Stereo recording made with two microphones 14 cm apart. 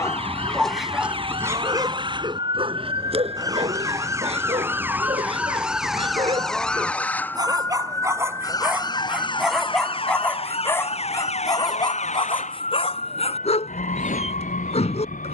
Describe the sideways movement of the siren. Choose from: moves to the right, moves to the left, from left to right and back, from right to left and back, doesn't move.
moves to the left.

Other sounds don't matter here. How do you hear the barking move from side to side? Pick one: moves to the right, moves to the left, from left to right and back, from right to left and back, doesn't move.
from left to right and back.